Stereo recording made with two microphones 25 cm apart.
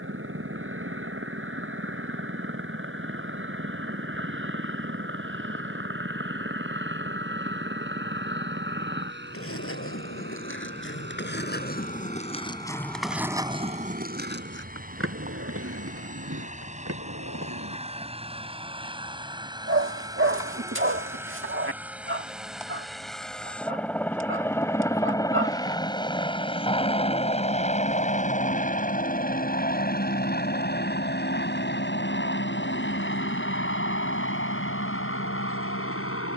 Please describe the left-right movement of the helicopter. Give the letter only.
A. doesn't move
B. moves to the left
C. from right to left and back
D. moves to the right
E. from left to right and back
B.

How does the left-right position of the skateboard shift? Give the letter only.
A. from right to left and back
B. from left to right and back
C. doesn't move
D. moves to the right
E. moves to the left
D.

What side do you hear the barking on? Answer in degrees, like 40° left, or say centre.
60° right.